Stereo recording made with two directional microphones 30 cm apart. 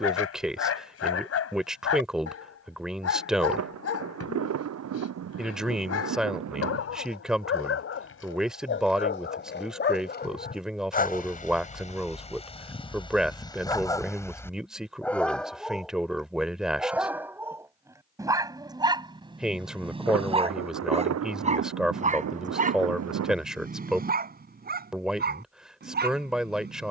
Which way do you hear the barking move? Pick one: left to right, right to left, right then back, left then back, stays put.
left to right.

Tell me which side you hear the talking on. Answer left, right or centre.
centre.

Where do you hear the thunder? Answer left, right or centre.
right.